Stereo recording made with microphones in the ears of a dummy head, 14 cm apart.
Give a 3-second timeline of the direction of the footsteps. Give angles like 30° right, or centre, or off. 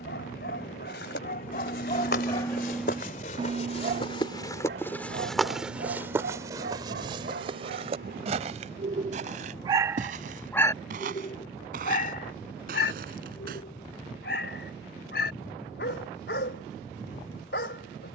70° left, 20° left, 30° right, 50° right, 60° right, off.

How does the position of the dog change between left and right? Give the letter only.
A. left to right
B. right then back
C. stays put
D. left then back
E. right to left
B.